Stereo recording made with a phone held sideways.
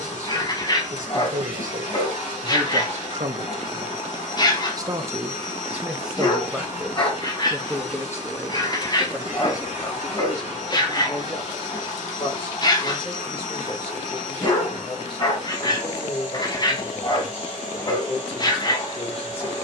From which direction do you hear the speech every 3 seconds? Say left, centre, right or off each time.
right, right, centre, left, left, left, left.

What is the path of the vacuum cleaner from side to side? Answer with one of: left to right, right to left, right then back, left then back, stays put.
stays put.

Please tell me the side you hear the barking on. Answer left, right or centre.
left.